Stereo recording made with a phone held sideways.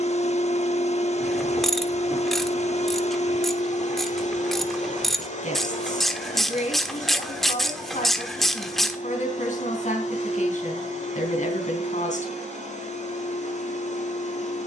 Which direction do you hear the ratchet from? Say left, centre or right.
centre.